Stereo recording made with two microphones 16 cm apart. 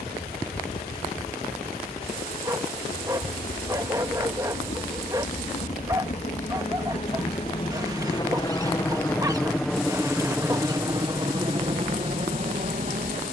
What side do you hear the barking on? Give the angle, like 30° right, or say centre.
20° right.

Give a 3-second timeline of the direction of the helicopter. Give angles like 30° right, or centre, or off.
70° left, 60° left, 30° left, 10° right, 40° right.